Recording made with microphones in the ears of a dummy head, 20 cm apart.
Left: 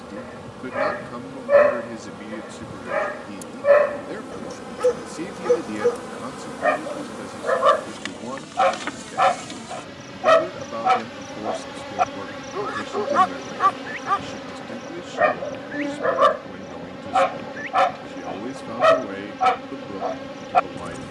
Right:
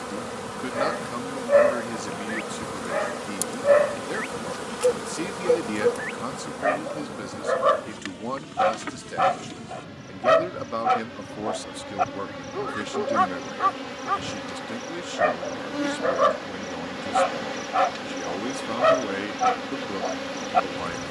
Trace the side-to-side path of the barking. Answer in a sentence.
You can hear the barking stay put.